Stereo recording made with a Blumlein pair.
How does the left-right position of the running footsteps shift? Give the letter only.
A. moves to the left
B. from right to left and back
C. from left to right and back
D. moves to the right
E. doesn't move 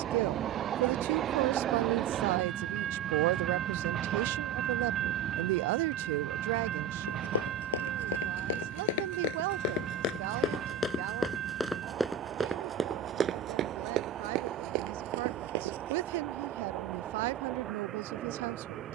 D.